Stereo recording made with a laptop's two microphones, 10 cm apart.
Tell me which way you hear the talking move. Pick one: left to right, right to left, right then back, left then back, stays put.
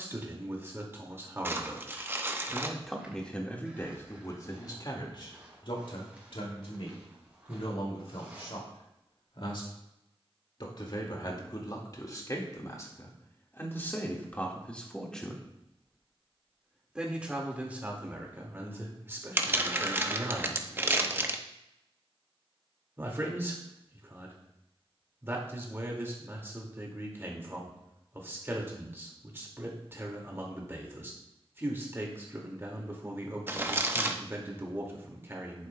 left then back.